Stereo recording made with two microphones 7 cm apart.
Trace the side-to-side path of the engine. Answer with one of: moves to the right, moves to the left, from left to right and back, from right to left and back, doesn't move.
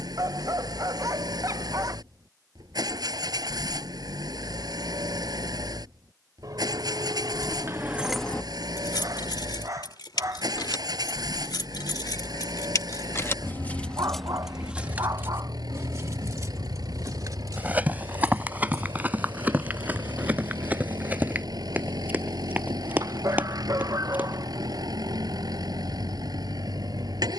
doesn't move.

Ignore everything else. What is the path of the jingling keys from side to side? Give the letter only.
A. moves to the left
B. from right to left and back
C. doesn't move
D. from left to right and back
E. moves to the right
B.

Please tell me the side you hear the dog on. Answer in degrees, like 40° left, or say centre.
50° right.